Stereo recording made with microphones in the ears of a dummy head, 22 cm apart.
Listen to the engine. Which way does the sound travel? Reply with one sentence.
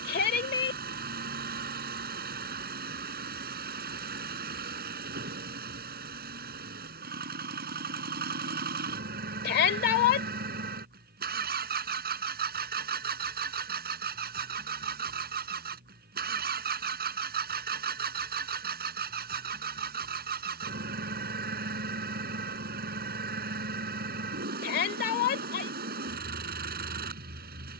You can hear the engine stay put.